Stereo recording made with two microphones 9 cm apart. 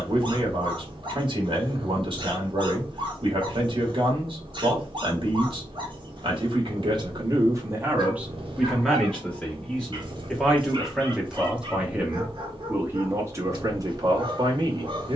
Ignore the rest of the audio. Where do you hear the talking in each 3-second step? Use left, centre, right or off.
right, right, right, centre, right.